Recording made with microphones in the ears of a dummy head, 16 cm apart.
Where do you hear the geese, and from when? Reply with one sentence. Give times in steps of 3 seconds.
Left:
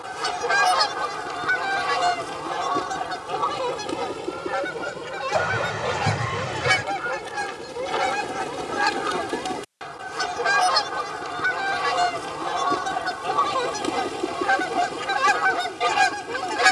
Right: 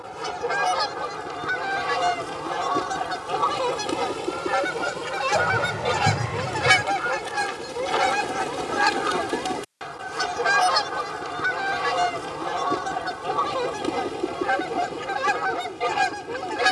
You can hear the geese on the left from 0 s, in the centre from 3 s and on the left from 12 s.